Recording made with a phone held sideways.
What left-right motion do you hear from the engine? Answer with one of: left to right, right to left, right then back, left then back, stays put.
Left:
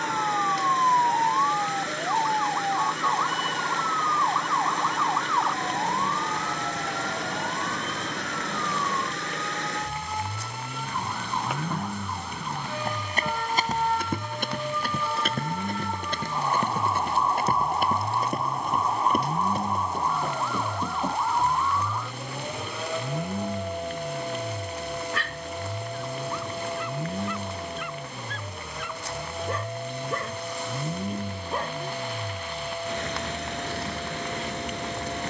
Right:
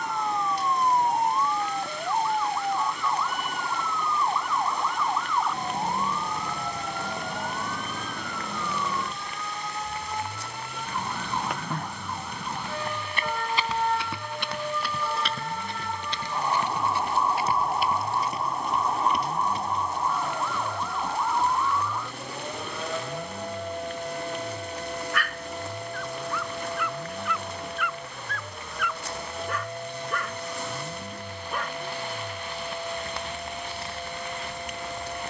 stays put.